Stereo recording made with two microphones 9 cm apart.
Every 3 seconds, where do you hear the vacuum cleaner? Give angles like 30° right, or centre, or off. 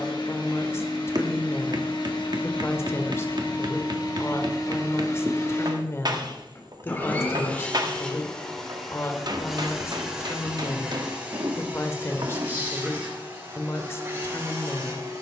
60° left, 50° left, 10° left, 10° right, 30° right.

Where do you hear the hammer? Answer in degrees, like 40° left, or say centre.
50° right.